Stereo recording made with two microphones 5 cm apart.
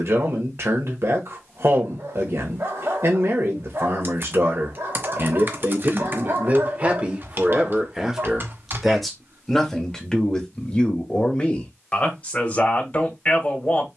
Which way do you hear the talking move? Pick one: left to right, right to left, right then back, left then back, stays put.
right to left.